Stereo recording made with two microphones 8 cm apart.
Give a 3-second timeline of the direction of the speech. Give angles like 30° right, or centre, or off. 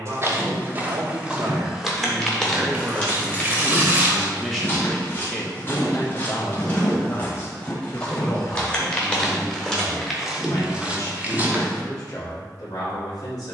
50° right, centre, 40° left, 50° left, 60° left.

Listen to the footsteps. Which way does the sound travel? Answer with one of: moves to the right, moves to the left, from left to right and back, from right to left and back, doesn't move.
from right to left and back.